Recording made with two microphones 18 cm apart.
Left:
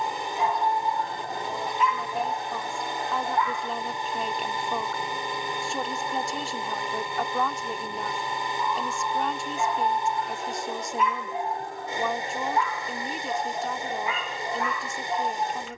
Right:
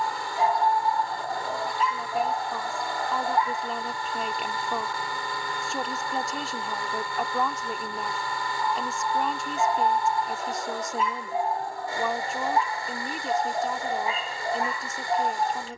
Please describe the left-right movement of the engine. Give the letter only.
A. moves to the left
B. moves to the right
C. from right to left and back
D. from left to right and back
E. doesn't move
E.